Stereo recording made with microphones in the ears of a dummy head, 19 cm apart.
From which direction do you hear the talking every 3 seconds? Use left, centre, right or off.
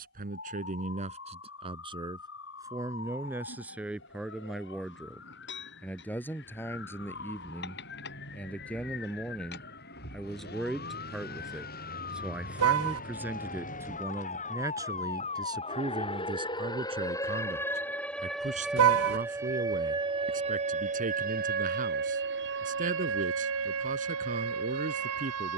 right, centre, centre, centre, centre, right, right, right, right.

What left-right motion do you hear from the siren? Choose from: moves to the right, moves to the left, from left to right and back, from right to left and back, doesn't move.
moves to the right.